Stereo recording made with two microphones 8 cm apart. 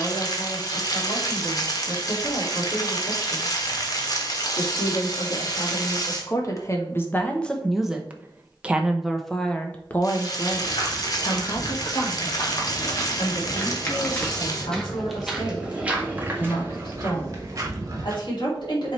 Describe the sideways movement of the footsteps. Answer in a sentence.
In this clip you hear the footsteps move from left to right.